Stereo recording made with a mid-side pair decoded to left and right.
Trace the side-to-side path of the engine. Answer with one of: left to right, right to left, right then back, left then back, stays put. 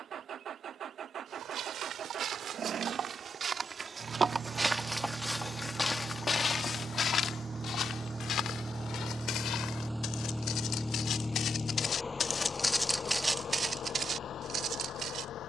right to left.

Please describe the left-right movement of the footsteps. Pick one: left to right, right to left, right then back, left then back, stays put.
left then back.